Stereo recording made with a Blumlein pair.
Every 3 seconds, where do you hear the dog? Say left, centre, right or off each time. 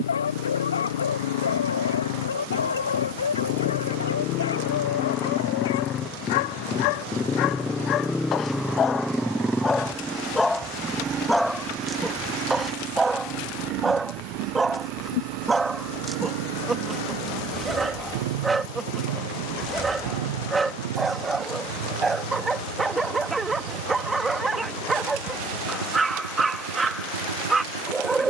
left, left, left, centre, centre, centre, centre, centre, centre, centre.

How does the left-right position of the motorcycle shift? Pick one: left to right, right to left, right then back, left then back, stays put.
left to right.